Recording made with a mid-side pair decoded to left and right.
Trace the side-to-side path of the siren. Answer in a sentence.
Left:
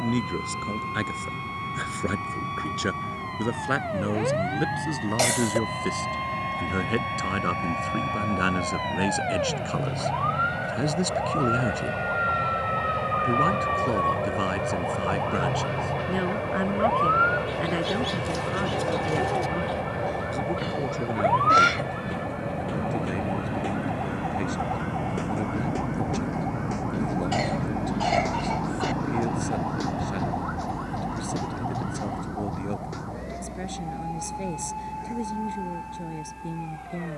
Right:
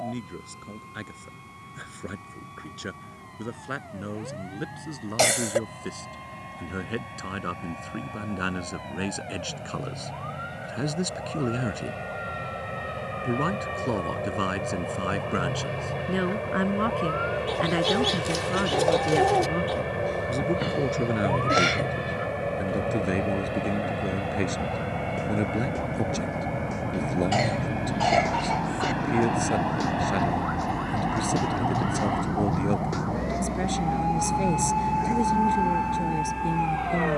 You can hear the siren move from left to right.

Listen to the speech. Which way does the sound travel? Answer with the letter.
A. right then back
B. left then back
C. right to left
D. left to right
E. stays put
D.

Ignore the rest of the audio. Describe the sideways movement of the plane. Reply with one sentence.
You can hear the plane move from left to right.